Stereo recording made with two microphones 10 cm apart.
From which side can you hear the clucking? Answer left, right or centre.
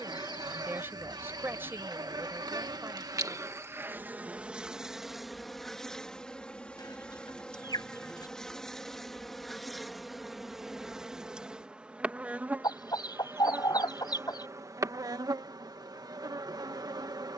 left.